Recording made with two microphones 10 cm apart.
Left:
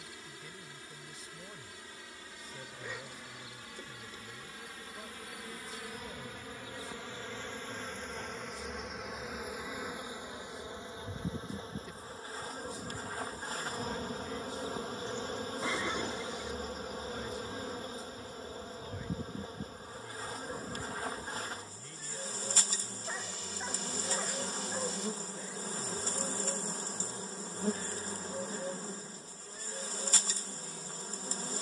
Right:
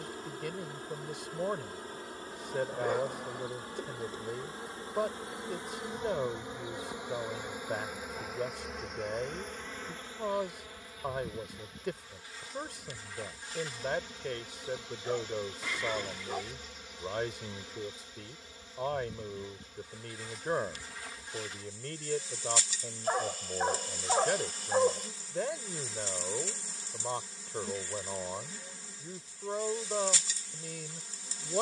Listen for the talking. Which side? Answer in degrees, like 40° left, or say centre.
80° right.